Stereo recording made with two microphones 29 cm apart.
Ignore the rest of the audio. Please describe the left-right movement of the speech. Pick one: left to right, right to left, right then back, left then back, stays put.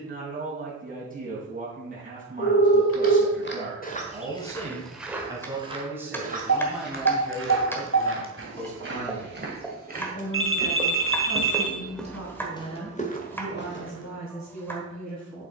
right to left.